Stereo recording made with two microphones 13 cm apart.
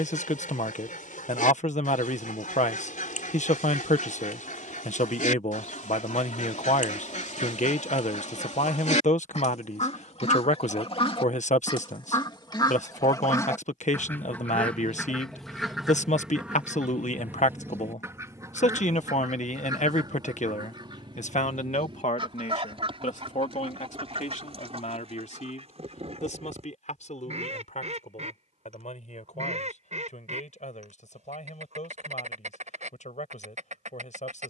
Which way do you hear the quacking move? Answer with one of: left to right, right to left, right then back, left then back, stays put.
left to right.